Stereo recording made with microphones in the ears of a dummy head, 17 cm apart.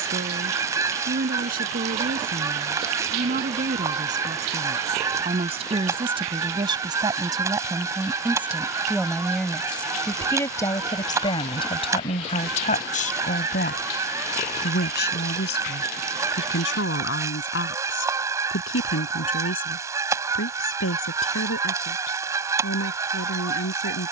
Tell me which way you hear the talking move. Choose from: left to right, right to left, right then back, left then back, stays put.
right to left.